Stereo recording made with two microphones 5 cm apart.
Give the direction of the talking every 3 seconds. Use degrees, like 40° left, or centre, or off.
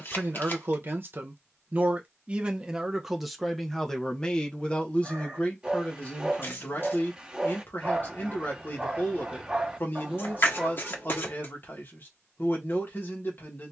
30° right, 20° left, 40° left, 40° left, 40° left.